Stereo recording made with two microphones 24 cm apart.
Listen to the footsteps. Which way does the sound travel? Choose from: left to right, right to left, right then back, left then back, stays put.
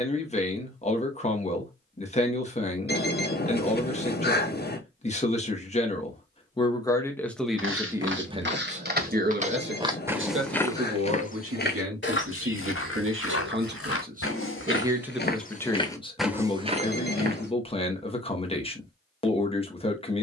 left then back.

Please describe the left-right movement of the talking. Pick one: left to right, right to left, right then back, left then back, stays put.
right then back.